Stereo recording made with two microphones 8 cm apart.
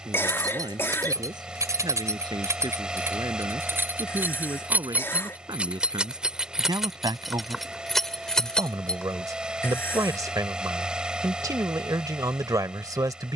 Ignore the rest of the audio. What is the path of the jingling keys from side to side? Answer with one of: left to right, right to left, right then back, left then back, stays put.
right to left.